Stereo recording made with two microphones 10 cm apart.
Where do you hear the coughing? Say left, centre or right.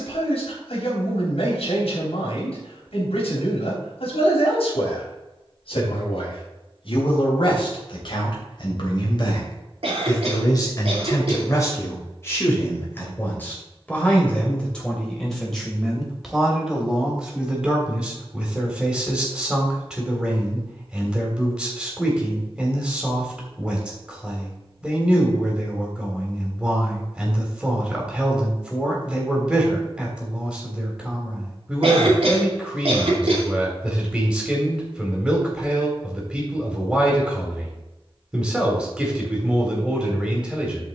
right.